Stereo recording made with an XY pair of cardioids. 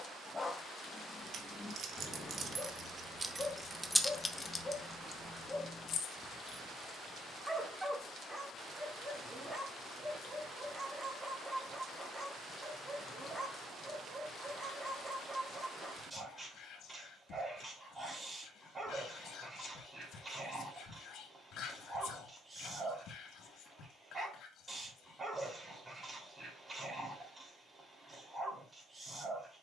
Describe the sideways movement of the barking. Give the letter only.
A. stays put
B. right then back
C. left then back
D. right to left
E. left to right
E.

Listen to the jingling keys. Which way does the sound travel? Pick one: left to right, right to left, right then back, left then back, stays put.
right to left.